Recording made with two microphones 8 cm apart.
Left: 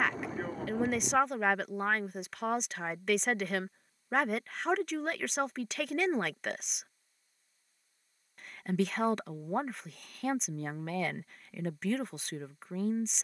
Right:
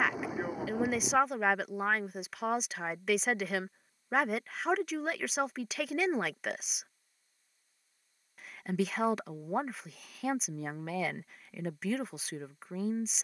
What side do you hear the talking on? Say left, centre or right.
centre.